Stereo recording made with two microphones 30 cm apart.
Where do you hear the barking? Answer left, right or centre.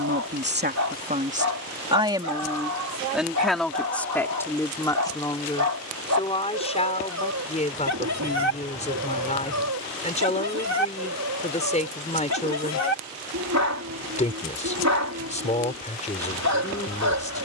right.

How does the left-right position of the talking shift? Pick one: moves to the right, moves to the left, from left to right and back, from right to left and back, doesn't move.
moves to the left.